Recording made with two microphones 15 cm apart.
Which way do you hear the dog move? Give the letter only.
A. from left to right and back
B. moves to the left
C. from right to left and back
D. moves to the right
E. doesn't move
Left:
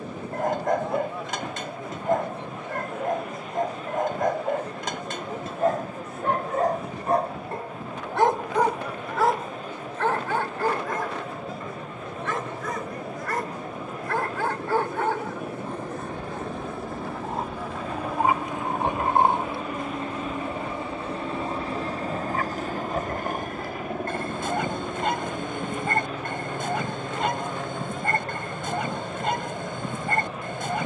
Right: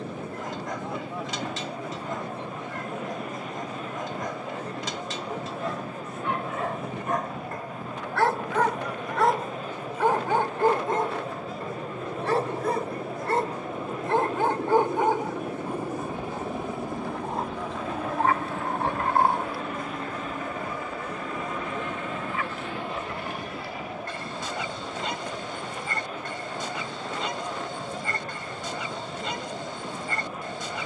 A.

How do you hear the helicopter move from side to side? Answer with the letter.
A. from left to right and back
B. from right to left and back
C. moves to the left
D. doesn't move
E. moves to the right
C.